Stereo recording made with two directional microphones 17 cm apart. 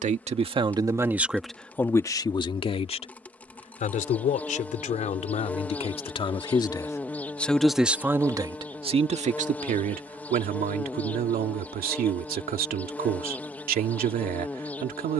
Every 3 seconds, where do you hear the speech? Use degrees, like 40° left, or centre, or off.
centre, 40° left, centre, 60° right, 60° right.